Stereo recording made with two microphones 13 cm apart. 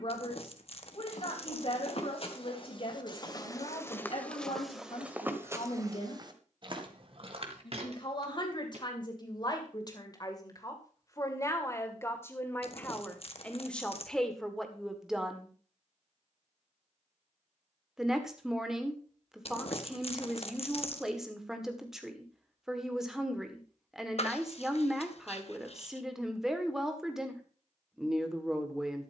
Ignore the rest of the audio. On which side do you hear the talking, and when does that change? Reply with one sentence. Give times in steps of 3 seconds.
In this clip you hear the talking on the left from 0 s and in the centre from 12 s.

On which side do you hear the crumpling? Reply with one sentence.
You can hear the crumpling on the left.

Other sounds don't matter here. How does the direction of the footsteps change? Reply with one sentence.
You can hear the footsteps travel towards the right.